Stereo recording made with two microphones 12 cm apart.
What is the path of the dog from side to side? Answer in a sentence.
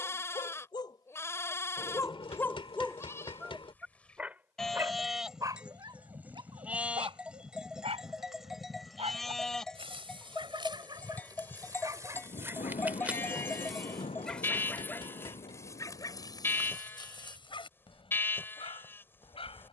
You can hear the dog move from left to right and back again.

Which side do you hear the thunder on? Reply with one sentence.
You can hear the thunder on the left.